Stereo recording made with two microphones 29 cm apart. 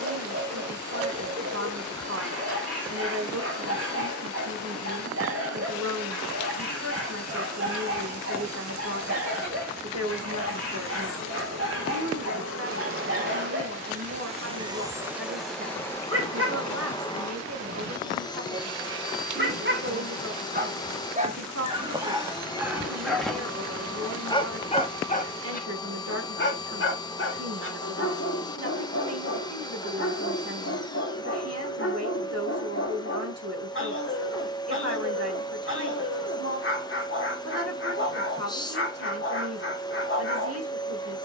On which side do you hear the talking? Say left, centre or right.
right.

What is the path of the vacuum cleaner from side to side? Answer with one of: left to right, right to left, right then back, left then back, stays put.
right to left.